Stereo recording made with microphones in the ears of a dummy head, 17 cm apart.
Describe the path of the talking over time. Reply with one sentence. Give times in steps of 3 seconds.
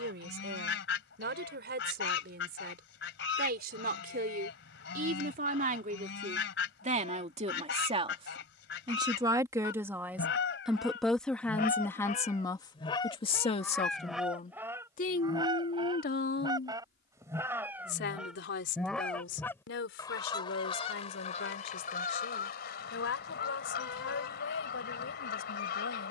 In this clip you hear the talking on the right from 0 s, in the centre from 9 s and on the left from 12 s.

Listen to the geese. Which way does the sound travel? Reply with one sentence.
In this clip you hear the geese go right and come back.